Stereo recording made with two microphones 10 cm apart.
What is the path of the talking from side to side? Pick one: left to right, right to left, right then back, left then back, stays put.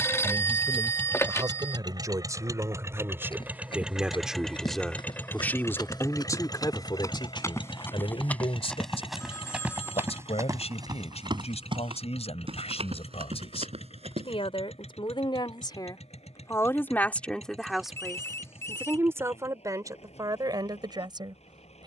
left then back.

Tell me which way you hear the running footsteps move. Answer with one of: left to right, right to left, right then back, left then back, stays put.
left to right.